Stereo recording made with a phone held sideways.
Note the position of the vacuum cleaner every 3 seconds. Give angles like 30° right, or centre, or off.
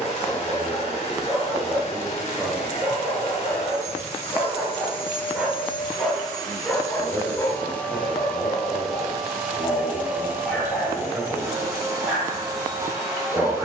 40° left, 40° left, 10° left, 10° right, 20° right.